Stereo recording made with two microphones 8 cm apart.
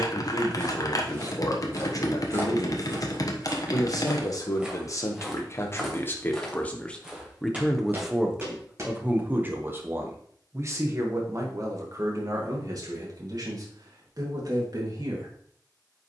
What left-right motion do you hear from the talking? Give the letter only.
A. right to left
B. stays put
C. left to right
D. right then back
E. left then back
C.